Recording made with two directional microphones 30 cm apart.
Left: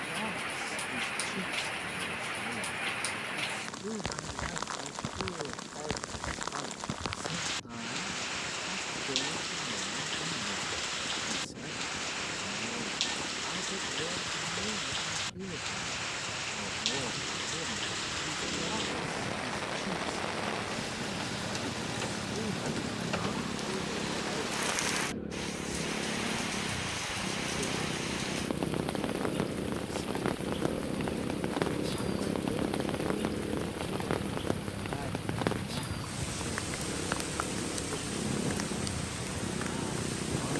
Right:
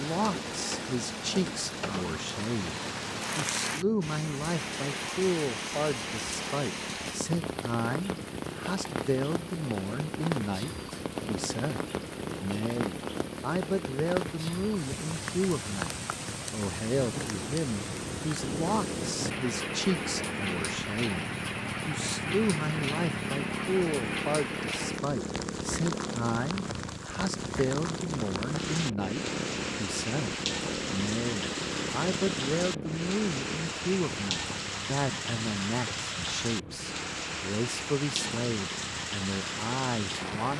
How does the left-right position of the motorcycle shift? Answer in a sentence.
In this clip you hear the motorcycle go from the right side to the left.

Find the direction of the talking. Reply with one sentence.
In this clip you hear the talking on the right.